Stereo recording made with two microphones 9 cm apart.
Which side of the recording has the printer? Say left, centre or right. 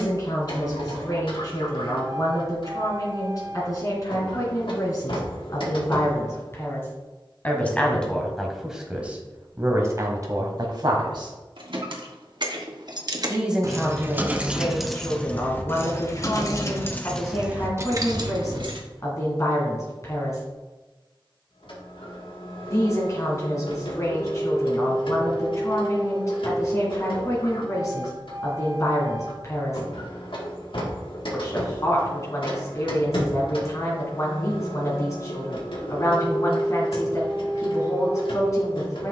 left.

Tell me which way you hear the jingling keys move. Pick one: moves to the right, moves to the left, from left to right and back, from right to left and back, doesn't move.
from right to left and back.